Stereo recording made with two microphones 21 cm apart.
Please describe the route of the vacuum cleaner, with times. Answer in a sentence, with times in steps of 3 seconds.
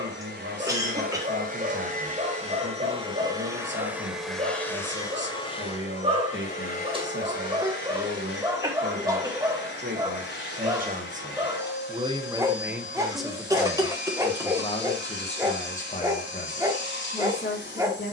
You can hear the vacuum cleaner on the right from 0 s, in the centre from 3 s and on the left from 6 s.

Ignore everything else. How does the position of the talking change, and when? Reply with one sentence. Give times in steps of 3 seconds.
You can hear the talking on the right from 0 s, in the centre from 12 s and on the left from 15 s.